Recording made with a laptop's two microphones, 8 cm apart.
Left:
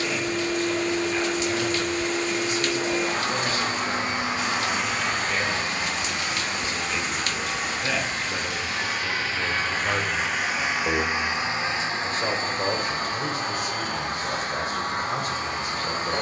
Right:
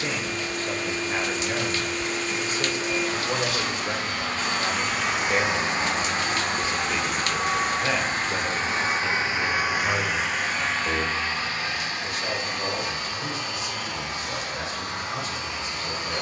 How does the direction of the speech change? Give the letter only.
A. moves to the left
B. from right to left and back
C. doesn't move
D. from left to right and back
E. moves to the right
A.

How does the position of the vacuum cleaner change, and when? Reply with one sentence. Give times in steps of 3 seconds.
In this clip you hear the vacuum cleaner on the left from 0 s, in the centre from 3 s, on the right from 6 s, in the centre from 9 s and on the left from 12 s.